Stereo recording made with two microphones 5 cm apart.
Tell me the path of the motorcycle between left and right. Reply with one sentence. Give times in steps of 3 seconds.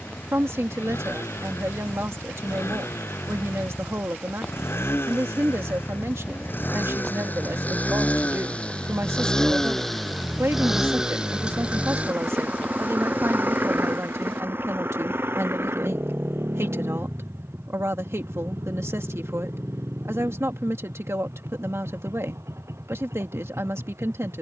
In this clip you hear the motorcycle on the left from 0 s, in the centre from 9 s and on the right from 12 s.